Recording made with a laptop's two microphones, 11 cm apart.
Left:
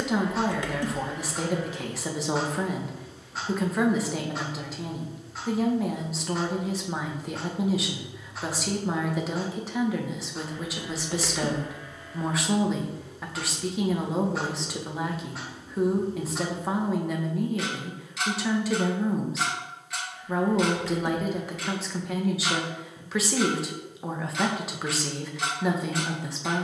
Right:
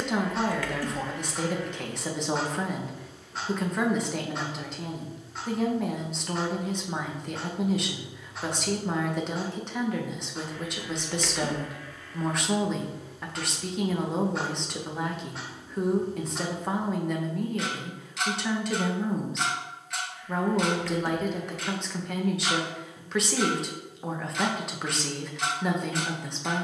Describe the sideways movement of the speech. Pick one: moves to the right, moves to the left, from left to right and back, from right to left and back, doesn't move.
doesn't move.